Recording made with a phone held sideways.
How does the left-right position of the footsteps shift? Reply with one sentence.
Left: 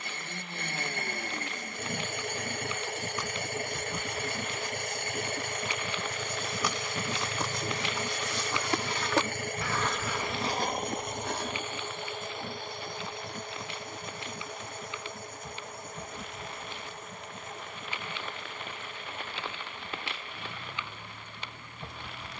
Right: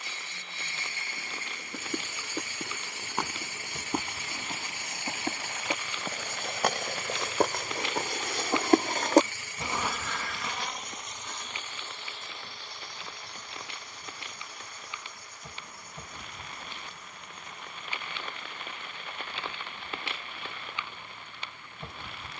You can hear the footsteps travel towards the left.